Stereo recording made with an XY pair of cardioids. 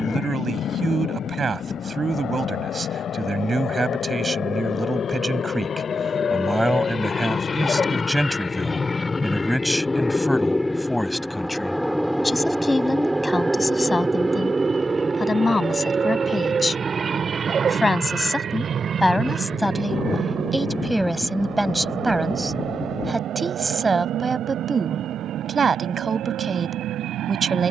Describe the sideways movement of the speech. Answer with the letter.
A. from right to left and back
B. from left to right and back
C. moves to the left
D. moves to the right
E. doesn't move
A.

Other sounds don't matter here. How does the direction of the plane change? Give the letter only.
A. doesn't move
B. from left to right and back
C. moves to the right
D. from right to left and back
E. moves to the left
C.